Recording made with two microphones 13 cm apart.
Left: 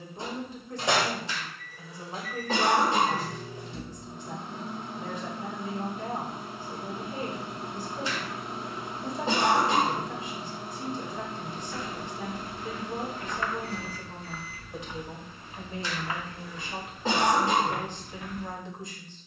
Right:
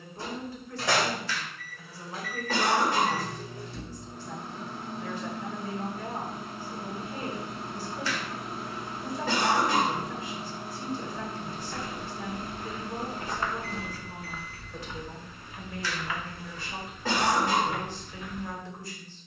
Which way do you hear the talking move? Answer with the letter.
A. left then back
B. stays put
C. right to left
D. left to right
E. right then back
B.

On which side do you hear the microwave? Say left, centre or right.
left.